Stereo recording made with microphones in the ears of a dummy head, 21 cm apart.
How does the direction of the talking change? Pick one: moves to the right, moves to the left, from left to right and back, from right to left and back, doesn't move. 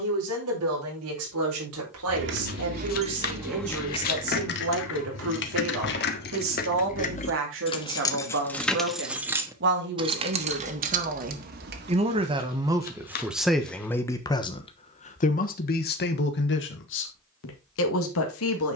moves to the left.